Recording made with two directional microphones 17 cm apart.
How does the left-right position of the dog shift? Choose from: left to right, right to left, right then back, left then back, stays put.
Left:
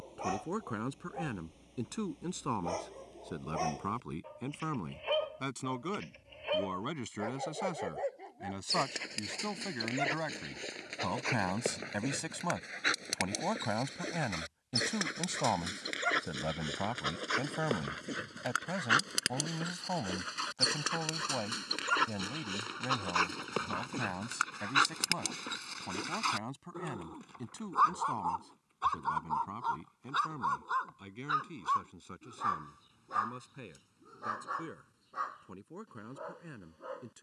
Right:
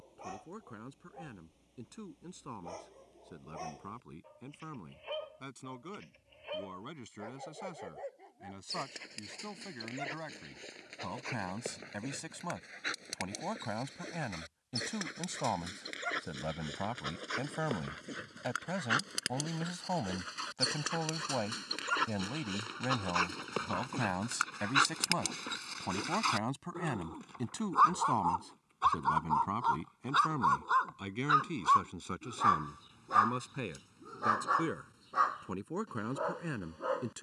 left to right.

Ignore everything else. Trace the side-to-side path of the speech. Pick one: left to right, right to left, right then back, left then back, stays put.
left to right.